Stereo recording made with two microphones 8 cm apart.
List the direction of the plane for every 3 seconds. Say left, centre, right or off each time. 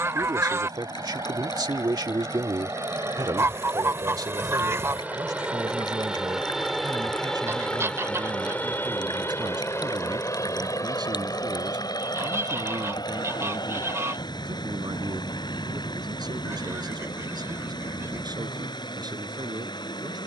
right, right, centre, left, left, left, left.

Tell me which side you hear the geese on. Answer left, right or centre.
right.